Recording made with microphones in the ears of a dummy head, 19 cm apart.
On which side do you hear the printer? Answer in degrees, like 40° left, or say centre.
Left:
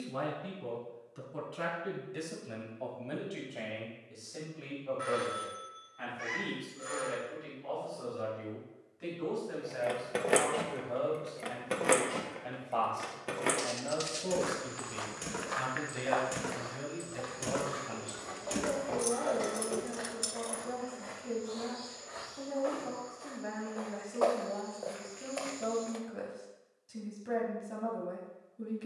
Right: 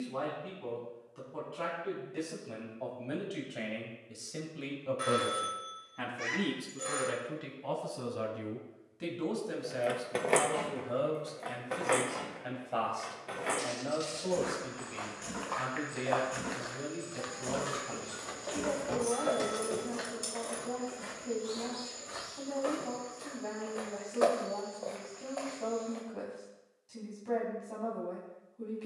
20° right.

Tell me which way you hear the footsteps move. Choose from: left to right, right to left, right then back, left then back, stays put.
right then back.